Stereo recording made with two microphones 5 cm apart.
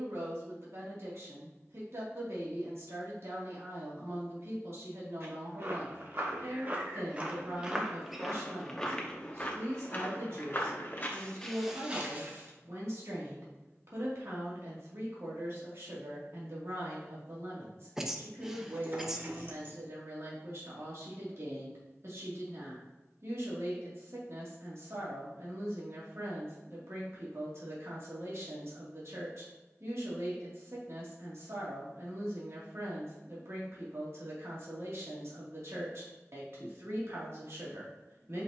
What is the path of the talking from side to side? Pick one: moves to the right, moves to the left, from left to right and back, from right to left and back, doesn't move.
doesn't move.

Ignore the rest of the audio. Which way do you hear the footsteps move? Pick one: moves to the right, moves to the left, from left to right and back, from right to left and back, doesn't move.
from right to left and back.